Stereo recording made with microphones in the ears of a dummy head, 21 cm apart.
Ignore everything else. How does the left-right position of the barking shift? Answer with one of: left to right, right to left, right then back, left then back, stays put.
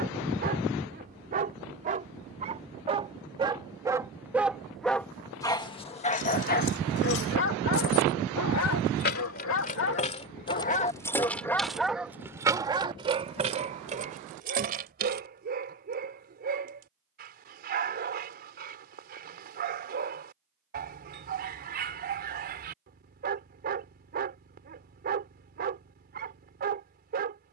left then back.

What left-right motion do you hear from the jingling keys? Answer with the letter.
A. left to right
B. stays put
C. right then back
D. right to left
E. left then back
A.